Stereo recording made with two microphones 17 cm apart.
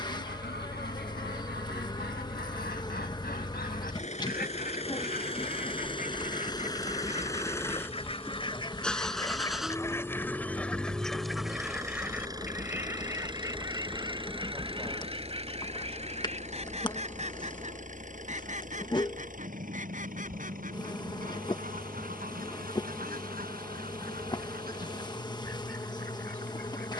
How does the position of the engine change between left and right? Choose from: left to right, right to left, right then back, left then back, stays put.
left to right.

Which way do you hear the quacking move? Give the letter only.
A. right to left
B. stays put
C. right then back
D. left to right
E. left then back
D.